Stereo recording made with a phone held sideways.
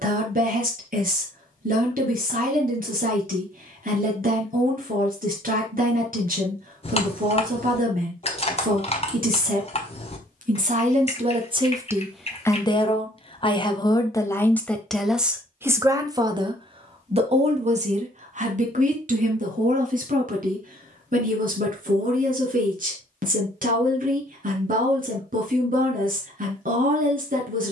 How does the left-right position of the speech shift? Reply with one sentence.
You can hear the speech go left and come back.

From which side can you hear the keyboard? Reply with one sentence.
You can hear the keyboard on the left.